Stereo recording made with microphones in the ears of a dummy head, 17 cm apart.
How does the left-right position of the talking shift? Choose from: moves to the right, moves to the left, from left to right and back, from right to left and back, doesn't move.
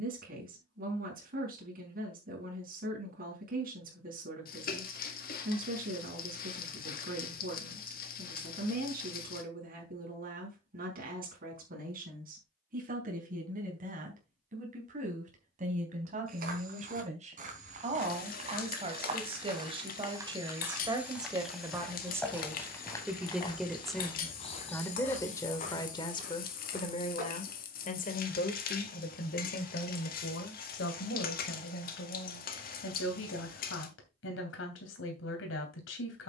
moves to the left.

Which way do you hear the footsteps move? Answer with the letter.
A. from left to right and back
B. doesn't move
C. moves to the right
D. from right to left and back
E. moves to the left
E.